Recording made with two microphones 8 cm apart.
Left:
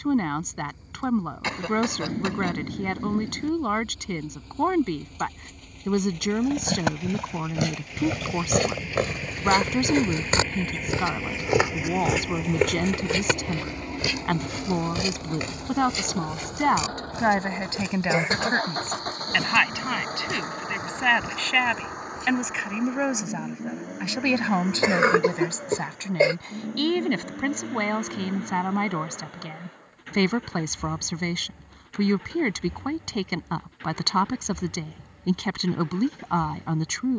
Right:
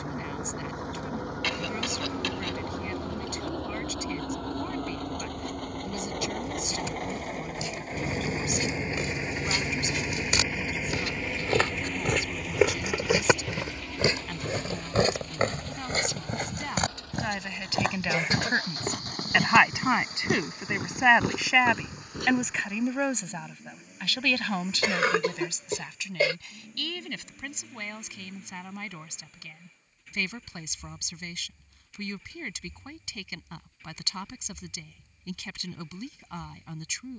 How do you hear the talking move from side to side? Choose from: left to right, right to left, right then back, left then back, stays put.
right then back.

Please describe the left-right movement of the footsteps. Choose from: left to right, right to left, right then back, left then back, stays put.
left to right.